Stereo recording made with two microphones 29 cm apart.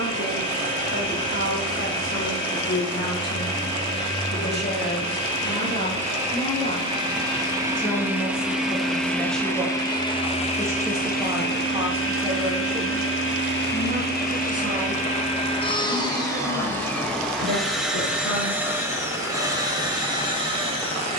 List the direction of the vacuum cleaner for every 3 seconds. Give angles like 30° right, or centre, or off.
20° right, 20° right, 10° right, 20° left, 40° left, 10° left, 10° right.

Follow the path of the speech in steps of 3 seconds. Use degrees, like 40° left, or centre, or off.
50° left, 30° left, 10° left, 10° right, 30° right, 50° right, 60° right.